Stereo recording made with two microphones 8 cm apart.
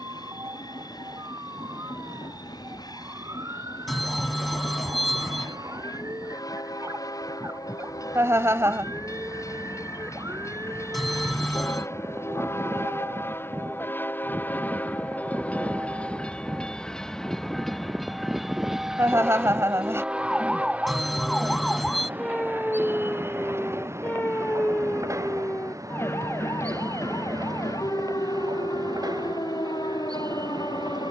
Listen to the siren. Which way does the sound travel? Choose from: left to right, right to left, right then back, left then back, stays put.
right to left.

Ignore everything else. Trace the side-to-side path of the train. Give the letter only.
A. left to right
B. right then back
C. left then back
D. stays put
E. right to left
A.